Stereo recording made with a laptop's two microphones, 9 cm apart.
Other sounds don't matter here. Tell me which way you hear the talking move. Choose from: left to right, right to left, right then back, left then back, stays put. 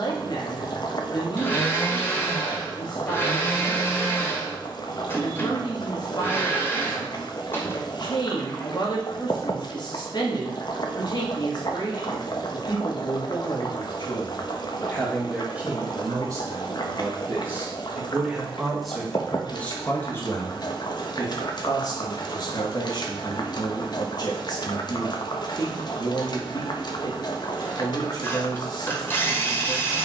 right then back.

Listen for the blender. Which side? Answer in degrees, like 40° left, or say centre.
30° left.